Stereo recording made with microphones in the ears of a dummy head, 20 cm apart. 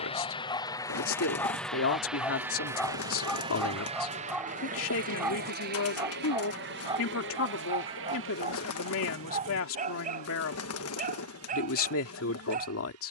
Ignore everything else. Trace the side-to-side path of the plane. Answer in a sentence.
You can hear the plane travel towards the right.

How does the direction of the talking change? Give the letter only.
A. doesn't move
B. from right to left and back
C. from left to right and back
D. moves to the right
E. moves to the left
A.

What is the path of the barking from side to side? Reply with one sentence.
You can hear the barking go from the left side to the right.